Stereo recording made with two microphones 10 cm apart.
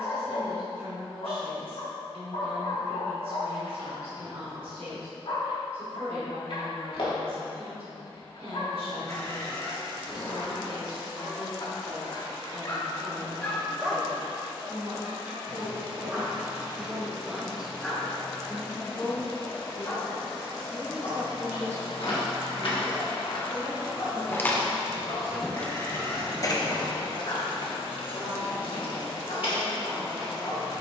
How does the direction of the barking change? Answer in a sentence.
In this clip you hear the barking go right and come back.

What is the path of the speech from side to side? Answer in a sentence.
In this clip you hear the speech move from right to left and back again.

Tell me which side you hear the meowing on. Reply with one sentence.
In this clip you hear the meowing on the left.